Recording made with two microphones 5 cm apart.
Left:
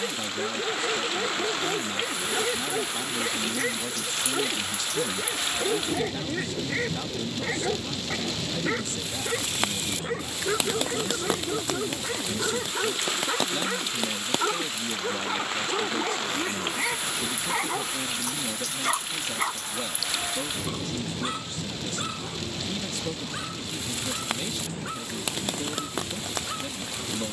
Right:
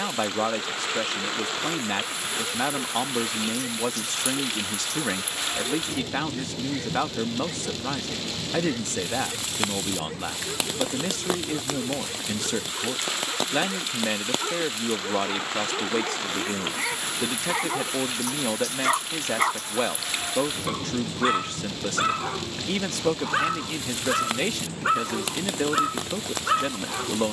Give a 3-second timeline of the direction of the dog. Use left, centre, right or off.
left, left, left, left, left, centre, right, right, right.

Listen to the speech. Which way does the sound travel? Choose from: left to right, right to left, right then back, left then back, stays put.
stays put.